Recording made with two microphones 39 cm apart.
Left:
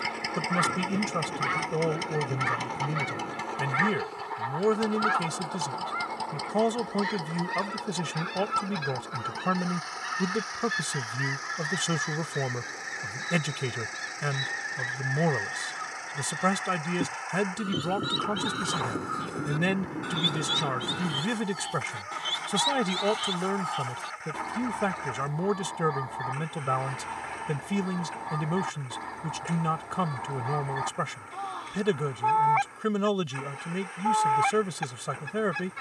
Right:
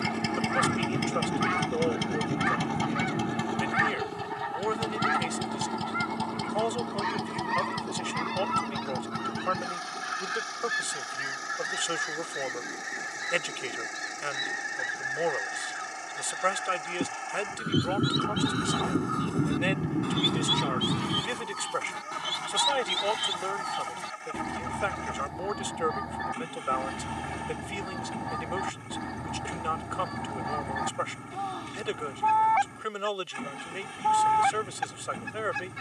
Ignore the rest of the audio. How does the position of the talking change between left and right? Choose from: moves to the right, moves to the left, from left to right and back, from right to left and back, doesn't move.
doesn't move.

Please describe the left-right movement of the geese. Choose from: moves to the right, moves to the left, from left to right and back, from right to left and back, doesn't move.
from right to left and back.